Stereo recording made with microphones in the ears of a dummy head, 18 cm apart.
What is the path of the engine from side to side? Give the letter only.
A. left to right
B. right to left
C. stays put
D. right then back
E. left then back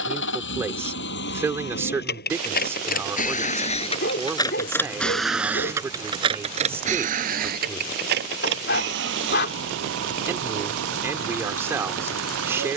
A.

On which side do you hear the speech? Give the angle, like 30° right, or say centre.
10° right.